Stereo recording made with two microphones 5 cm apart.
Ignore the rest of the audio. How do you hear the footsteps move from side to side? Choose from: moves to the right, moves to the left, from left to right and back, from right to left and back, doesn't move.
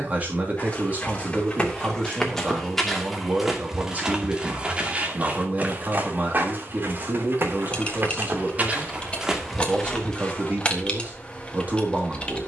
from left to right and back.